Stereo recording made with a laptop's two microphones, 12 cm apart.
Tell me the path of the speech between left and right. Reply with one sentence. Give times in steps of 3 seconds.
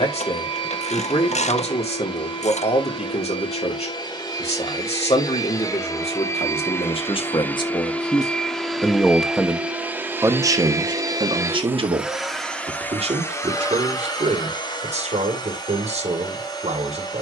In this clip you hear the speech on the left from 0 s and on the right from 9 s.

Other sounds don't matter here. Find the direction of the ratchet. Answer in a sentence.
You can hear the ratchet on the left.